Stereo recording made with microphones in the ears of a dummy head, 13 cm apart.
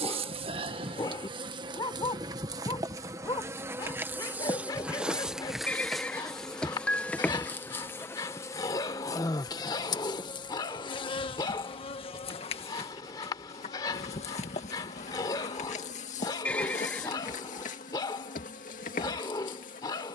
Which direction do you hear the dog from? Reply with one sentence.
You can hear the dog on the left.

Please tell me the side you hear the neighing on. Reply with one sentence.
You can hear the neighing in the centre.